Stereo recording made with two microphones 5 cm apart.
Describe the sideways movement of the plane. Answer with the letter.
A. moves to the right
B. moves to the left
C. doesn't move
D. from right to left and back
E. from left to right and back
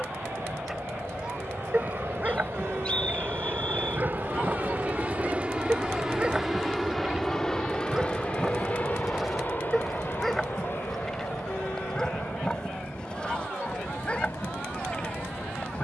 B.